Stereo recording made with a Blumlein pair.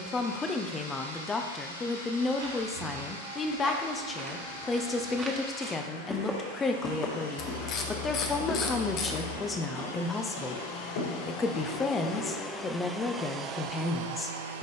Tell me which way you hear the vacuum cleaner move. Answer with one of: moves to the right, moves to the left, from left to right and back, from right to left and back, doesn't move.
moves to the right.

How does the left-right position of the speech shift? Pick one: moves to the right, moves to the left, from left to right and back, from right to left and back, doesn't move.
doesn't move.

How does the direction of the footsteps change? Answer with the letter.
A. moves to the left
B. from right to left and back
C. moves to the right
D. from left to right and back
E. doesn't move
A.